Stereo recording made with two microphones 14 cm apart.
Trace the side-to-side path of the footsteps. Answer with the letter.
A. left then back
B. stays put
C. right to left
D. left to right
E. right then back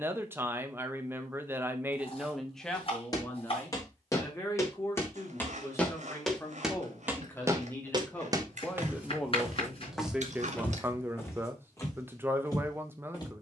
E.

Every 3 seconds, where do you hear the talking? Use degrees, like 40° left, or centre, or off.
10° right, 20° left, 10° left, 10° right, 20° right.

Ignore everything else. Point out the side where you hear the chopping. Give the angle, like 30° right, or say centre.
40° left.